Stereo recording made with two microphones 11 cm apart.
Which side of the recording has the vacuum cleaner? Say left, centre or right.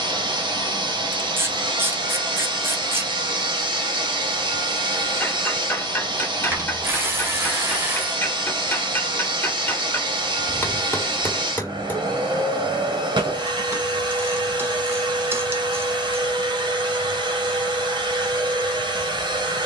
right.